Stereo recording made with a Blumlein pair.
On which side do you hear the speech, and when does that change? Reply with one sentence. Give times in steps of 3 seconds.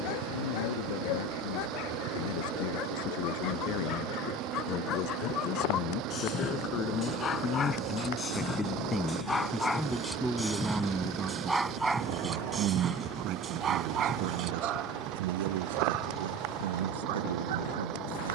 In this clip you hear the speech on the left from 0 s, in the centre from 9 s and on the right from 12 s.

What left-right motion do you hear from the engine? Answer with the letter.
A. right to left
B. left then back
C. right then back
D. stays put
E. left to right
D.